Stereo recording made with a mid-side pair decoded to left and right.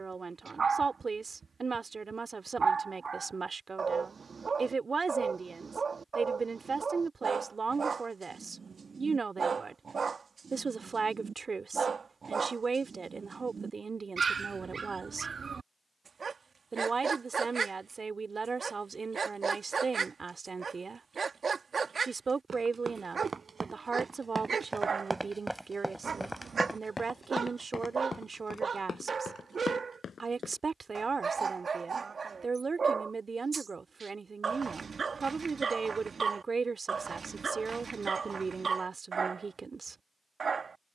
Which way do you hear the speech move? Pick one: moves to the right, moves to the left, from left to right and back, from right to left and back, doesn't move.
doesn't move.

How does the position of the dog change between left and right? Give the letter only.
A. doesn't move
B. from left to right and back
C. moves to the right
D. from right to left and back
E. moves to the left
A.